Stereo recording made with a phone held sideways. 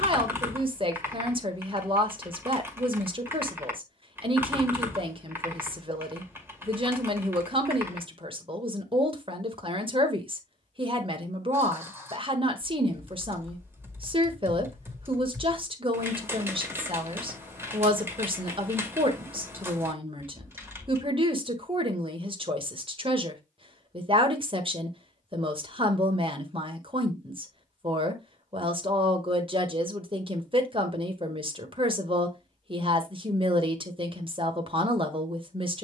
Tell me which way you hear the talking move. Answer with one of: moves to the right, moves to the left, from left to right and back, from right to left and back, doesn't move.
doesn't move.